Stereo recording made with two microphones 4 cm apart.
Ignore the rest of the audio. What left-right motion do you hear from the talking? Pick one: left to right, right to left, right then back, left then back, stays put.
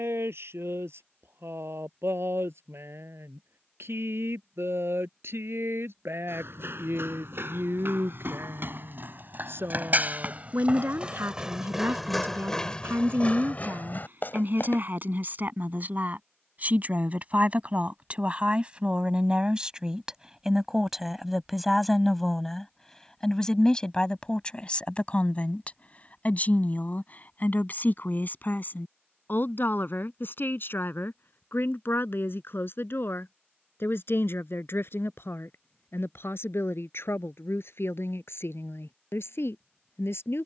right to left.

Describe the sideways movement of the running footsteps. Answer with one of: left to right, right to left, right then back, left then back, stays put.
right to left.